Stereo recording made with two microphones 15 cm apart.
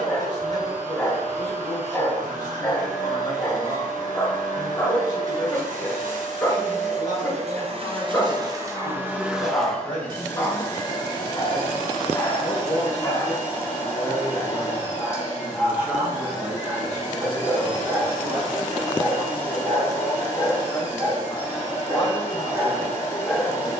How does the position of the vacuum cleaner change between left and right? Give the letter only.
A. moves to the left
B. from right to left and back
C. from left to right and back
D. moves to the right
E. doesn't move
A.